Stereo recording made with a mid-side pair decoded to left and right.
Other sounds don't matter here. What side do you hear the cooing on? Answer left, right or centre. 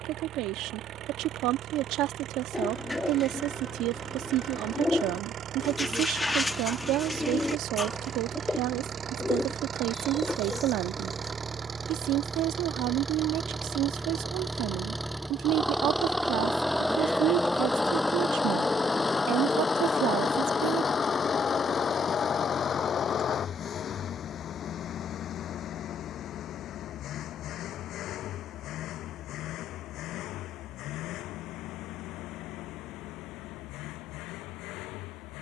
centre.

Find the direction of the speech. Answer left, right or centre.
right.